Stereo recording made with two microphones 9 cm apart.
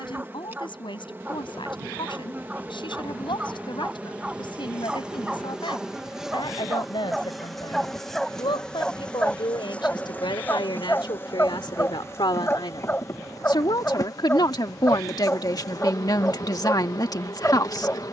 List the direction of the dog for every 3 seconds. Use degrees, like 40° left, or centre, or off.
20° right, 10° right, centre, 20° left, 20° left, 20° left.